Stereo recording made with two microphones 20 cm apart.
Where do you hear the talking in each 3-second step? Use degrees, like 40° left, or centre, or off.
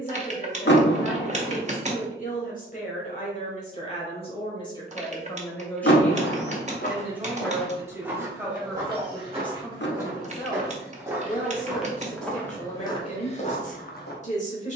40° left, 20° left, 10° right, 20° left, 40° left.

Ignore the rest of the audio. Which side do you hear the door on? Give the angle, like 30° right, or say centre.
60° left.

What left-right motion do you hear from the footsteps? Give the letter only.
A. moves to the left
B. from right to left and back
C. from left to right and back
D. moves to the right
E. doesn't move
C.